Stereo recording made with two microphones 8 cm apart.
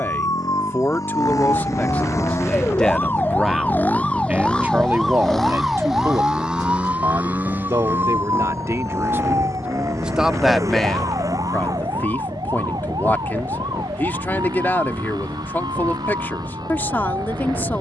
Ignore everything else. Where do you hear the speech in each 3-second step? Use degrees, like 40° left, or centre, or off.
20° left, 20° right, 50° right, centre, 30° left, 30° left.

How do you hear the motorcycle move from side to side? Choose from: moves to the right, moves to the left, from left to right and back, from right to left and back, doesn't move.
moves to the right.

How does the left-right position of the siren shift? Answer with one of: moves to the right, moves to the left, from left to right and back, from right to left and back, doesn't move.
moves to the right.